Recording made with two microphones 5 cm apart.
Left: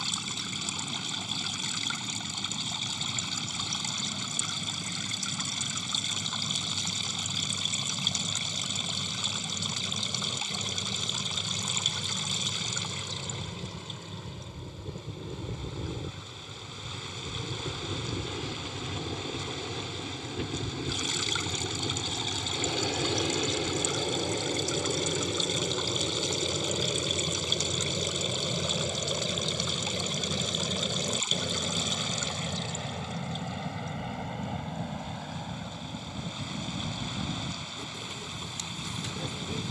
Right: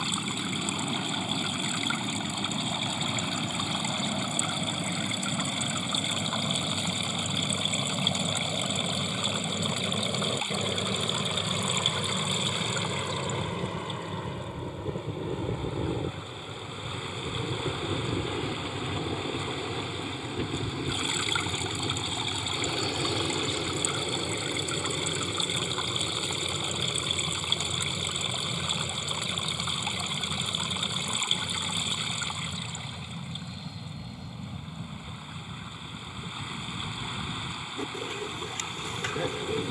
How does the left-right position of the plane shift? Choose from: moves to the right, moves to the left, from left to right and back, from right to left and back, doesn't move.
moves to the left.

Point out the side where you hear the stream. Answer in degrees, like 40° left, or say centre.
20° right.